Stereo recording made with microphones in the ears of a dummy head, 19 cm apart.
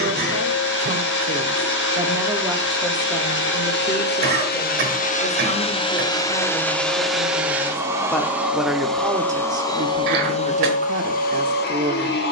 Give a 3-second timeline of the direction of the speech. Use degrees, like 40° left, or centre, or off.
20° right, 20° left, 10° left, 30° right.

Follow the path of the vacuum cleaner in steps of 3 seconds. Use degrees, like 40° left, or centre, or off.
50° left, 40° left, centre, 30° left.